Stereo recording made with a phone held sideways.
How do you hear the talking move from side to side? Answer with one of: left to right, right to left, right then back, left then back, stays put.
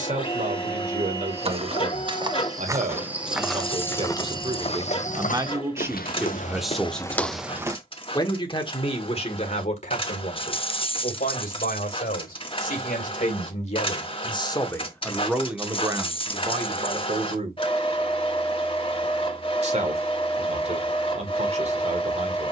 left then back.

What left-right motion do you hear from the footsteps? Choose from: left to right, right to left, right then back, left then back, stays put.
left then back.